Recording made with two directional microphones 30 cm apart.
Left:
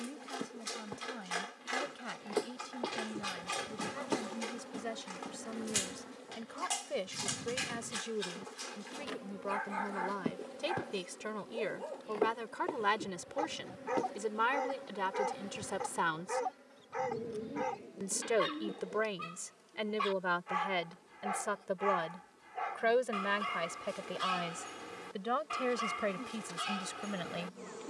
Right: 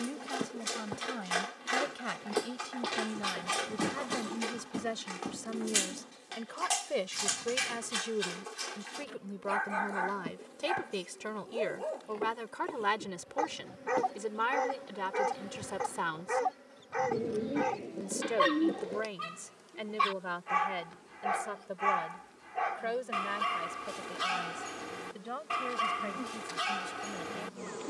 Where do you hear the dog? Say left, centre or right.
right.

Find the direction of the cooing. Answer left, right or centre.
right.